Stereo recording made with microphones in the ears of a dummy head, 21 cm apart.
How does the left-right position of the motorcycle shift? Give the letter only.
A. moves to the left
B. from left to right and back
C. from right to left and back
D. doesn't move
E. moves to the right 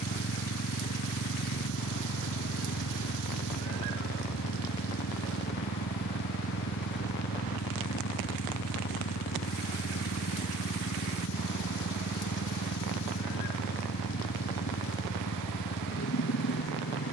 D.